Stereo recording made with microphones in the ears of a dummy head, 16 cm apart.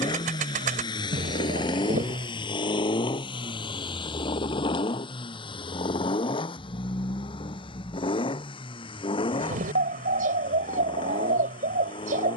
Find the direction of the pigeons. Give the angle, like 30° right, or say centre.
50° right.